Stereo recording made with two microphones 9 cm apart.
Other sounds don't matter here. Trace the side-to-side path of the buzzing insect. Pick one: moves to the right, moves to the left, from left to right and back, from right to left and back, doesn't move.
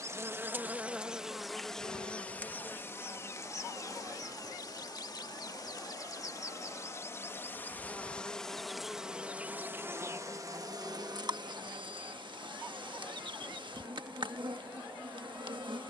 from right to left and back.